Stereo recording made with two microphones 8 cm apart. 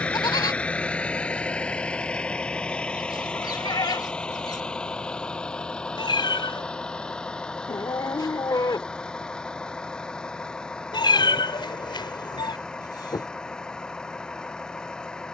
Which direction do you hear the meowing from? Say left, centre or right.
left.